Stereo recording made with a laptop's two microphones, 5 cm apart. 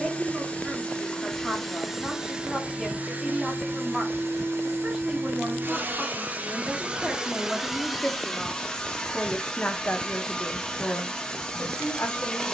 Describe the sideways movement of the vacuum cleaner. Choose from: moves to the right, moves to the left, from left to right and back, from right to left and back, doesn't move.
from left to right and back.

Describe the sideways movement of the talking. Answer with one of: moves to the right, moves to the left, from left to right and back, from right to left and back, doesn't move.
moves to the left.